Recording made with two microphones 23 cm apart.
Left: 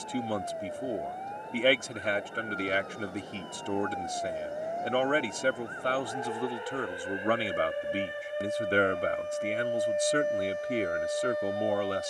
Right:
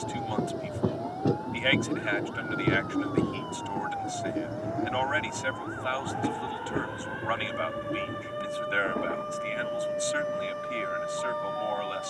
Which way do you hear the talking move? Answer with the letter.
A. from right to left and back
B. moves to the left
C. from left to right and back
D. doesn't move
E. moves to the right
D.